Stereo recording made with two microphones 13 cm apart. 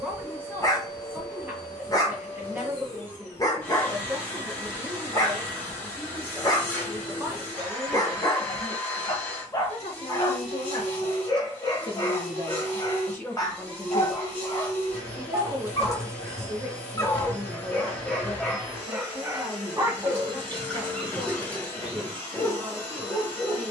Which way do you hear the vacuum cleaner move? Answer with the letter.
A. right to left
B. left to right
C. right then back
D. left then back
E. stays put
E.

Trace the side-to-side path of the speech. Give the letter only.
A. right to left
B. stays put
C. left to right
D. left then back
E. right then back
D.